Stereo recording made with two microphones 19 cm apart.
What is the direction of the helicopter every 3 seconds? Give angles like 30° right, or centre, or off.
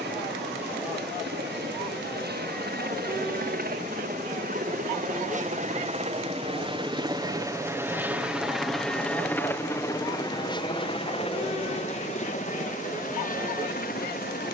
70° right, 50° right, 20° right, 20° left, 50° left.